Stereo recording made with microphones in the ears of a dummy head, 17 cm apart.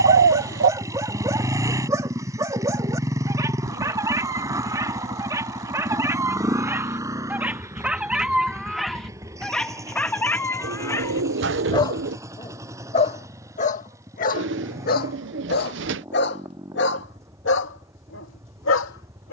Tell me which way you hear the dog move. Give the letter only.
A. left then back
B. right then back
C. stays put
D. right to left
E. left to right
D.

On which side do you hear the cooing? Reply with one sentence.
In this clip you hear the cooing on the right.